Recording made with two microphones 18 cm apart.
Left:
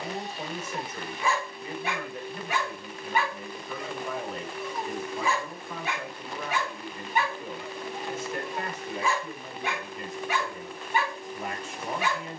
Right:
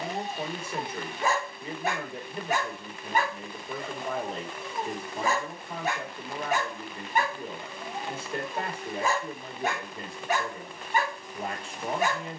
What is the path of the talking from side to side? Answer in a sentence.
You can hear the talking stay in one place.